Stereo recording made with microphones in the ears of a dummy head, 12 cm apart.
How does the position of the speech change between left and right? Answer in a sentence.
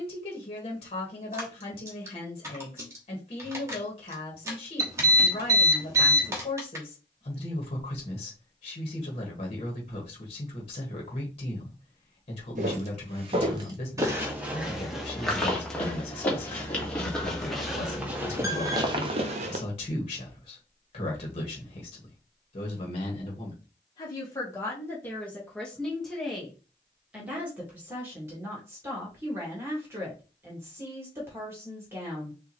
You can hear the speech move from left to right.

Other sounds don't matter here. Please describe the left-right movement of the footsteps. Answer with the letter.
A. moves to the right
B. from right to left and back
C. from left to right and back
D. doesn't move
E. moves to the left
B.